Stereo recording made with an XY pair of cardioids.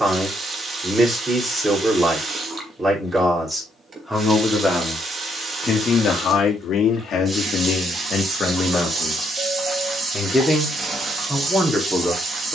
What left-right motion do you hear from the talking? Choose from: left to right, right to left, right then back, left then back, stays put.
left then back.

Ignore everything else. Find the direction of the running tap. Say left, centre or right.
right.